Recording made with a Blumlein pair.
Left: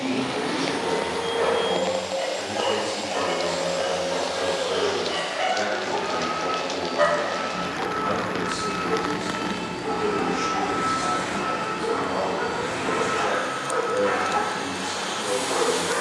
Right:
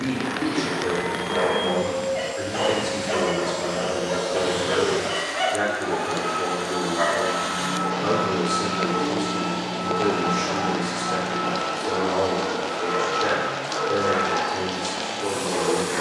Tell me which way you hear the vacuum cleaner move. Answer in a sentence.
In this clip you hear the vacuum cleaner move from left to right and back again.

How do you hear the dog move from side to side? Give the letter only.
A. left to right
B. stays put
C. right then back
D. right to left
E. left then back
D.